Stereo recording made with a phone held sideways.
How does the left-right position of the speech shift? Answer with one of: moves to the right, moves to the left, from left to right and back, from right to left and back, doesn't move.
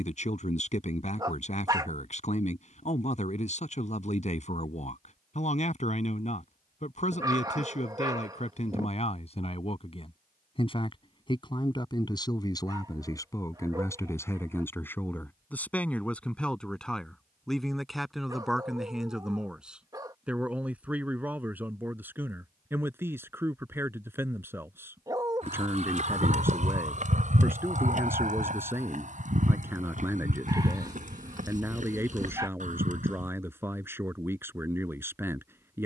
moves to the right.